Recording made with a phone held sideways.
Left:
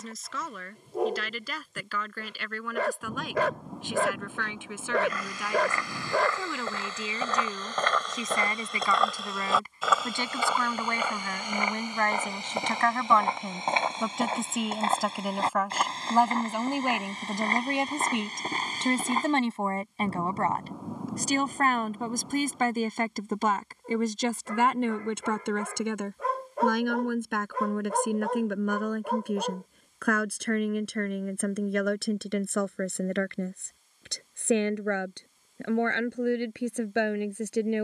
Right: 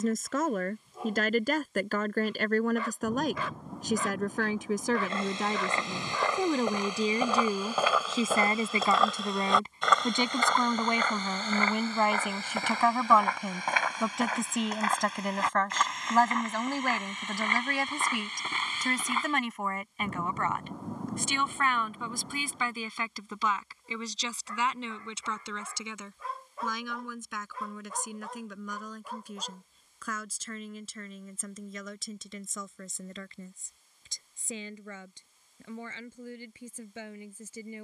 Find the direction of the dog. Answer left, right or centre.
left.